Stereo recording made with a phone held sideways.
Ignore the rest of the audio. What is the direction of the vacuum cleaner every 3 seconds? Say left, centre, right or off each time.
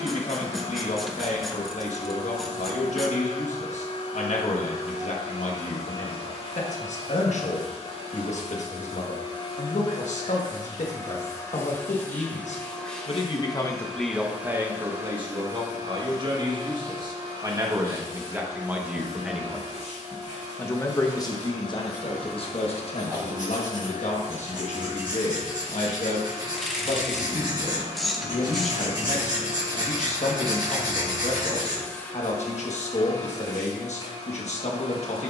left, left, left, left, centre, right, right, right, right, right, centre, left.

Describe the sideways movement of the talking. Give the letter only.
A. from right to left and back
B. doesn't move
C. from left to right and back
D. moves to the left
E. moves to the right
C.